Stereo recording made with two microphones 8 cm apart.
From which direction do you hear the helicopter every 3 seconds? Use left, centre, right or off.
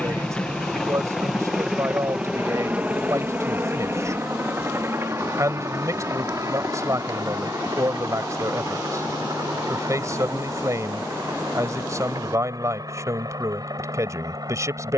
centre, right, right, right, right.